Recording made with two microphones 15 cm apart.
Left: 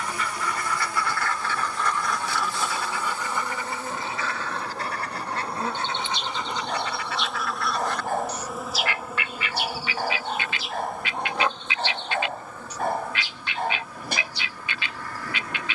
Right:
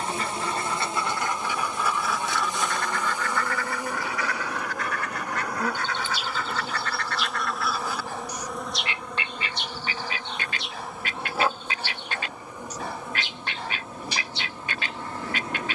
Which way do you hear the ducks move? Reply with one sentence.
You can hear the ducks move from right to left and back again.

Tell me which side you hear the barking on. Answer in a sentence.
You can hear the barking on the left.